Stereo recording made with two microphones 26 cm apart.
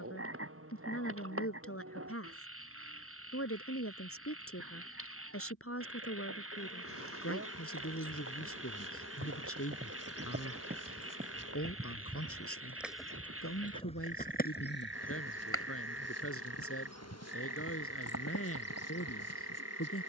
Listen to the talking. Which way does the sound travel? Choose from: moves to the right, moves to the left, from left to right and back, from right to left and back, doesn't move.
doesn't move.